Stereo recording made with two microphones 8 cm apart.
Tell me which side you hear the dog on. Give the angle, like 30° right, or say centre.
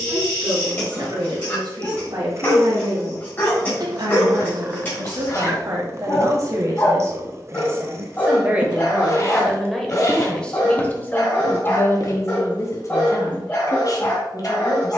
30° left.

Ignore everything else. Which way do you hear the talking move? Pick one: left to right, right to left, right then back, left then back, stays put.
right to left.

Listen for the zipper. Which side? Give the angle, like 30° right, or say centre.
40° left.